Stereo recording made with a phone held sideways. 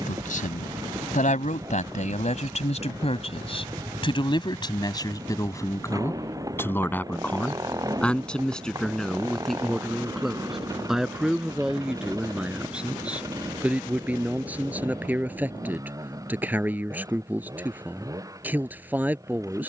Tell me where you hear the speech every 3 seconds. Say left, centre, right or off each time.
left, left, centre, centre, centre, centre, centre.